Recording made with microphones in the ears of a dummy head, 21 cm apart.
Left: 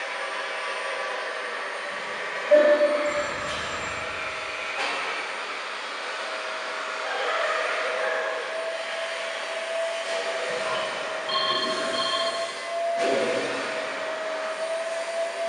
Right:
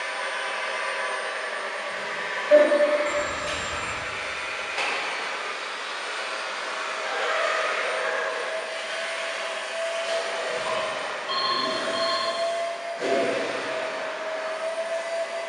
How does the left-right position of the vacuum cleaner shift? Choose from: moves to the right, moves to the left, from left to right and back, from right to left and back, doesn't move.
moves to the left.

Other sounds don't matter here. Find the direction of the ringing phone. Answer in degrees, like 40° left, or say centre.
20° left.